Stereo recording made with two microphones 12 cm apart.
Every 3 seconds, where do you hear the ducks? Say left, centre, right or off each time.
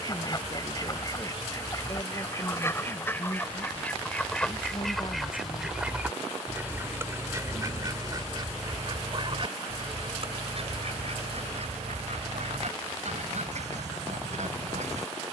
left, centre, right, right, right.